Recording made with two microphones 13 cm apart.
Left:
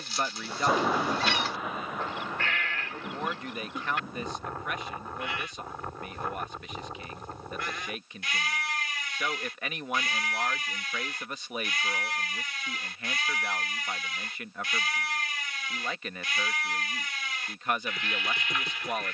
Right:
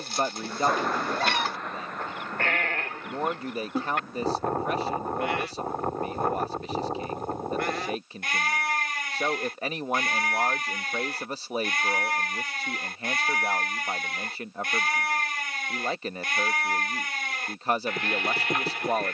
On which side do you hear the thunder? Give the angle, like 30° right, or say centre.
10° left.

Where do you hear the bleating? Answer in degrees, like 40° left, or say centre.
60° right.